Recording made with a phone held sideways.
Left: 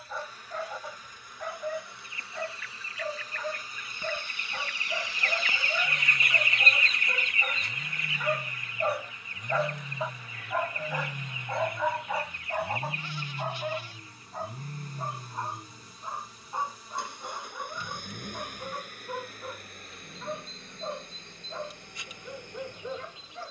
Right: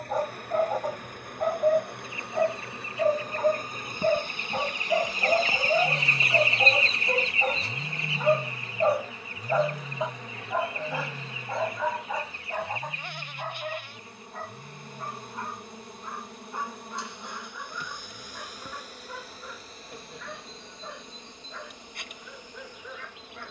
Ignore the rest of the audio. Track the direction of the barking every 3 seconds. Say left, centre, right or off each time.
right, right, right, centre, centre, left, left, left.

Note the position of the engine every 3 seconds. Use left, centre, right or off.
right, right, right, centre, left, left, left, left.